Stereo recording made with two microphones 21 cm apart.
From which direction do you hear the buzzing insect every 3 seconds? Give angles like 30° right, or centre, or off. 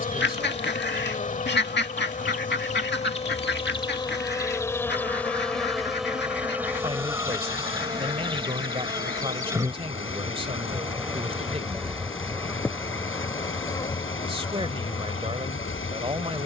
40° left, 20° left, 10° right, 10° right, 10° left, 30° left.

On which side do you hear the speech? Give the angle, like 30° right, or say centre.
30° right.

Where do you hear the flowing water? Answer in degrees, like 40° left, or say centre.
80° left.